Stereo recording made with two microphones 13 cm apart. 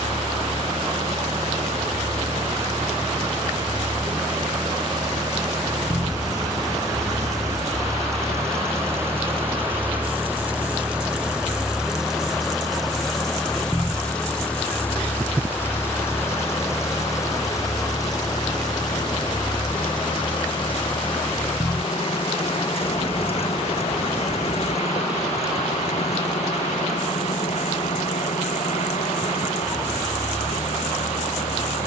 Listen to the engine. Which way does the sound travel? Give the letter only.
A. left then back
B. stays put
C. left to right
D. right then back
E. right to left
E.